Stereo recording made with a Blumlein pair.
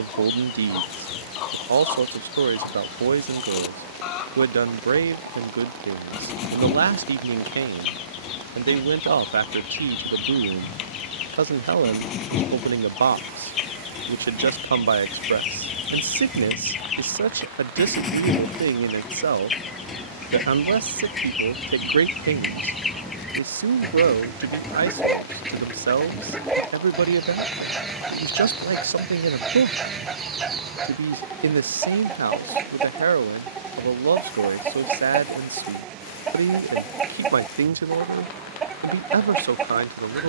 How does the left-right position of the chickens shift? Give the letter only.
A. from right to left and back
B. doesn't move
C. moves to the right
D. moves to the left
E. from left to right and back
C.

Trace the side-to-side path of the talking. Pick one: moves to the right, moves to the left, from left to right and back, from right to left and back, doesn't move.
doesn't move.